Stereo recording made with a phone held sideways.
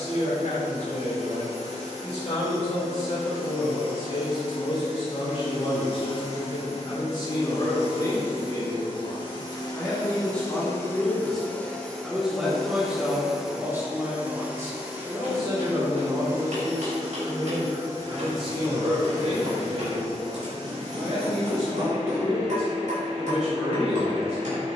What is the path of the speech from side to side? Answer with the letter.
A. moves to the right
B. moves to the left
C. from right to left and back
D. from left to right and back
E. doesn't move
A.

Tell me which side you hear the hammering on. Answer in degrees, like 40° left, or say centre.
70° right.